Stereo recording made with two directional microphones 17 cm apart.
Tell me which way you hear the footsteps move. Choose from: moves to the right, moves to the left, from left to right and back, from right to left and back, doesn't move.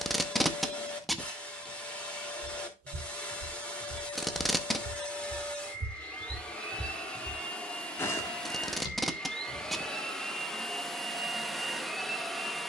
moves to the left.